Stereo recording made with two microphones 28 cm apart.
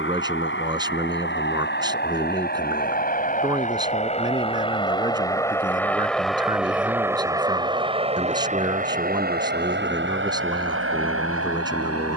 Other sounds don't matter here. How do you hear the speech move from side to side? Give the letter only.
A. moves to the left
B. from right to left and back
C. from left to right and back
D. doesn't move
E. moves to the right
D.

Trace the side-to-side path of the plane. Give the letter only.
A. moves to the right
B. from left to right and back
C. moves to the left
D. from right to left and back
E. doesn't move
A.